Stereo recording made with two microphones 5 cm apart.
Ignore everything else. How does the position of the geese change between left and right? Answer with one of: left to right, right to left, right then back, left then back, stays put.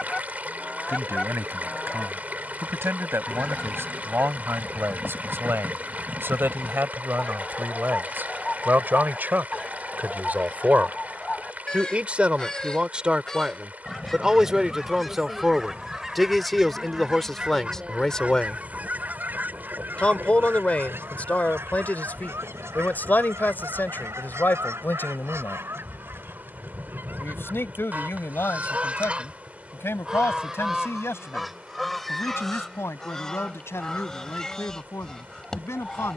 right then back.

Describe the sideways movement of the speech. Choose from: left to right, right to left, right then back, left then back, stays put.
right to left.